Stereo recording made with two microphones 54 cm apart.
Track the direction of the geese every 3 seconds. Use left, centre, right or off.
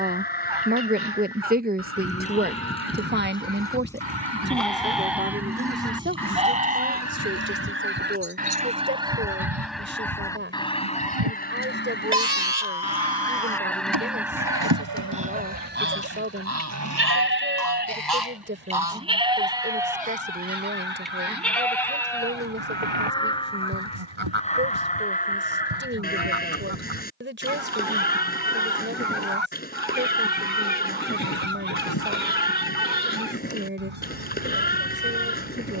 right, right, right, centre, centre, right, right, right, right, right, right, right.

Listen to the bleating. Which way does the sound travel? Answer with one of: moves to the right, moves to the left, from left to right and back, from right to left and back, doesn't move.
from left to right and back.